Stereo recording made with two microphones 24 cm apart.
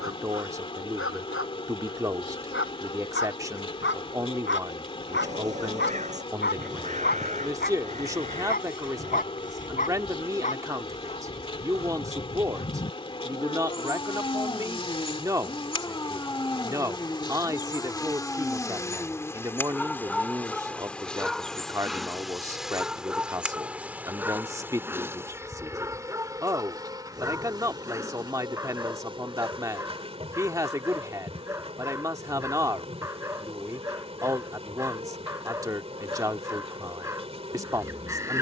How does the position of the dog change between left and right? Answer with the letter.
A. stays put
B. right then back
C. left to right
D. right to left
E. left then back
C.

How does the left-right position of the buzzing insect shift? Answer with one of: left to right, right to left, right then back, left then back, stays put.
left to right.